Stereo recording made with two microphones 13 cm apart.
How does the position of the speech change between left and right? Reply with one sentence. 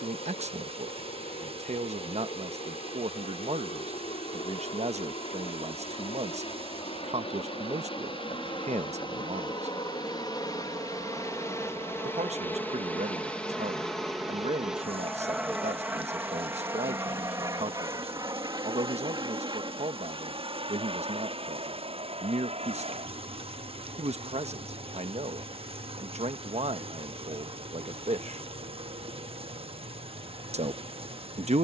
You can hear the speech stay put.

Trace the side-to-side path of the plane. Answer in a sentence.
You can hear the plane move from left to right.